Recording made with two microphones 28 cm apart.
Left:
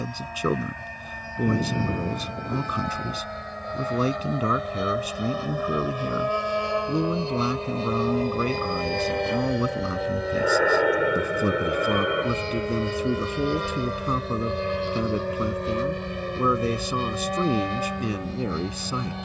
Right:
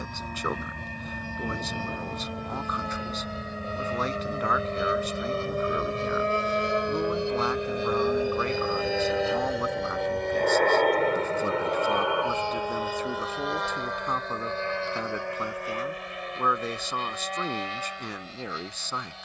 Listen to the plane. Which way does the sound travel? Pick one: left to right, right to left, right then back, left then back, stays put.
right to left.